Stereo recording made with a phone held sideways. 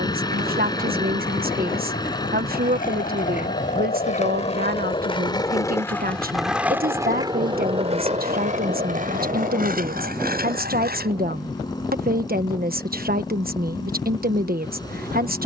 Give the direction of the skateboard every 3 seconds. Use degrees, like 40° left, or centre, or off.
60° left, 40° left, 30° right, 60° right, off.